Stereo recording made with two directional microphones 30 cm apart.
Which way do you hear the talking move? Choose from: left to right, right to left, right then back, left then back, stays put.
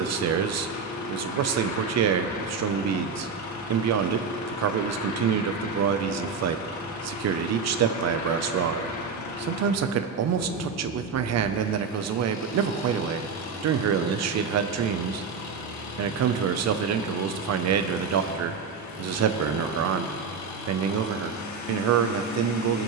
stays put.